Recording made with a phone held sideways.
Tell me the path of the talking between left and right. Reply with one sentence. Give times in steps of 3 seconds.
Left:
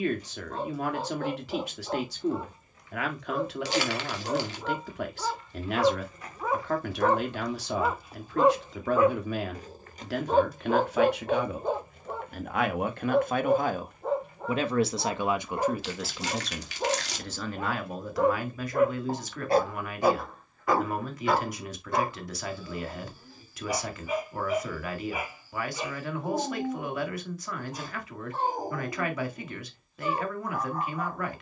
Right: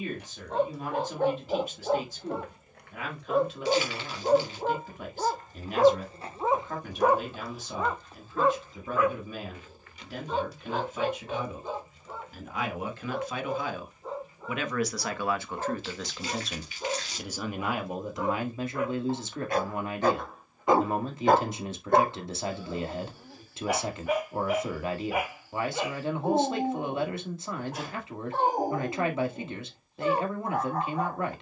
You can hear the talking on the left from 0 s, in the centre from 15 s and on the right from 18 s.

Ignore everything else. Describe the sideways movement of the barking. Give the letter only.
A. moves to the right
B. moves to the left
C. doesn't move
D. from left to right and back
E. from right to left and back
E.